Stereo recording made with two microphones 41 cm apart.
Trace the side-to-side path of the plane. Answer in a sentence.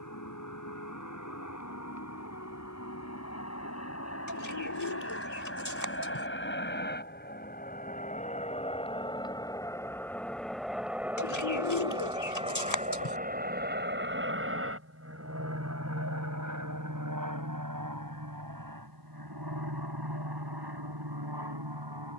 You can hear the plane travel towards the right.